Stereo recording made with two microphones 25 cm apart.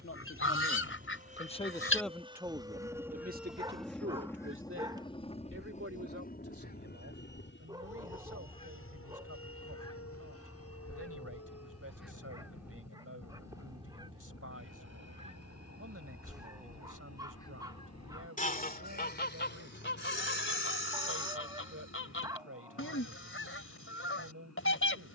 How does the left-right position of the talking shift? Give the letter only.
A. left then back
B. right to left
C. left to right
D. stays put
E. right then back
C.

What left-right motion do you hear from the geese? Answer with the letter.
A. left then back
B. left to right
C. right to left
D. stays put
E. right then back
E.